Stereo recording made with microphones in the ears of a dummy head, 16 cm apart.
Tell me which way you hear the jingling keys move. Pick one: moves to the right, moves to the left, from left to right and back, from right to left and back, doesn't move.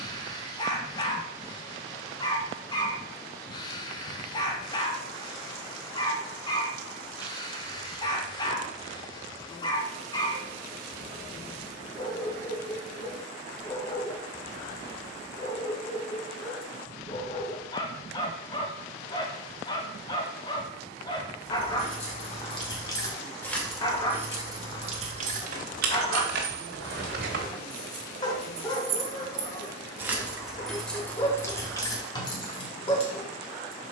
from left to right and back.